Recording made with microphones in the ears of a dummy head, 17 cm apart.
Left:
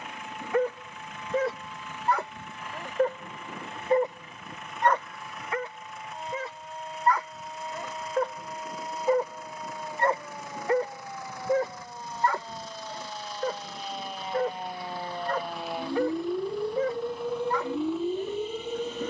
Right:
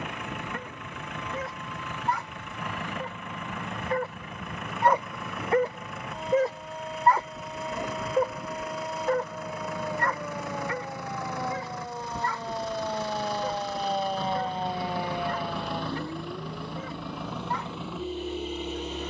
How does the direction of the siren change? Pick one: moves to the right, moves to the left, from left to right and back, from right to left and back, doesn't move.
moves to the left.